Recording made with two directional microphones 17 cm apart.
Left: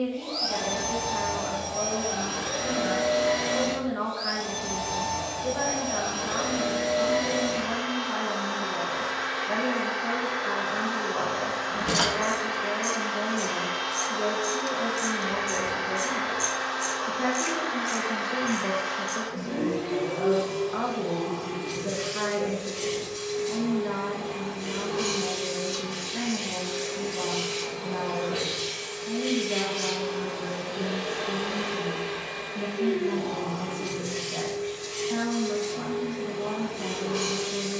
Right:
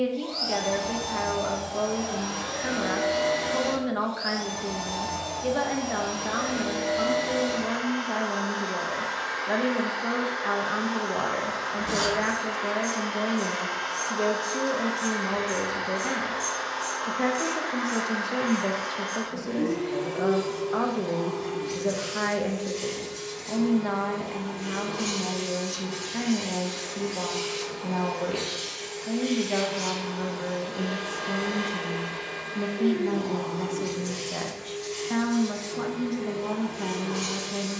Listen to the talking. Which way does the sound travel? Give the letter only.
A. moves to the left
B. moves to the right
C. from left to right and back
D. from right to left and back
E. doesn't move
E.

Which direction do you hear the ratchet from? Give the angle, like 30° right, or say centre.
40° left.